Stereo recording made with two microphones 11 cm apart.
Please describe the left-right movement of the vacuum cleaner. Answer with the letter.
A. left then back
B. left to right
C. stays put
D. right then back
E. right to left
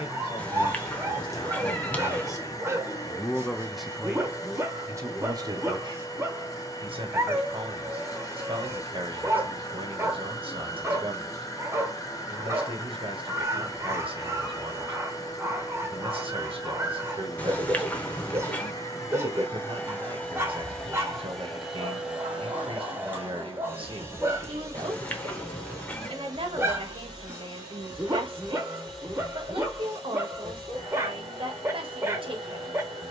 B.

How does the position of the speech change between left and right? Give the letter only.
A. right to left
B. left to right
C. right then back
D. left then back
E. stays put
B.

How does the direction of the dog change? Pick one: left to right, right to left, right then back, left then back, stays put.
stays put.